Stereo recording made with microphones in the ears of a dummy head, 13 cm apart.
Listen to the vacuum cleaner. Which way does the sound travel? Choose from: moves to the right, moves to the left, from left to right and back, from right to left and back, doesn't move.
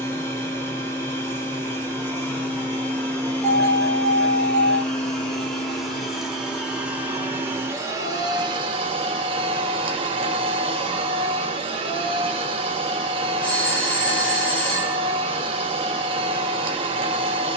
moves to the right.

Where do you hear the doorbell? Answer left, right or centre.
centre.